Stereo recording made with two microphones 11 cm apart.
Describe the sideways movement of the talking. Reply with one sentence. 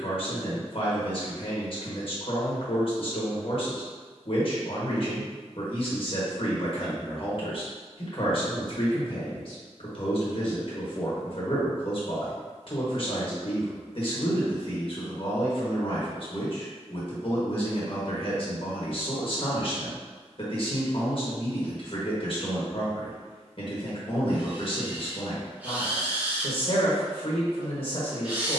You can hear the talking stay put.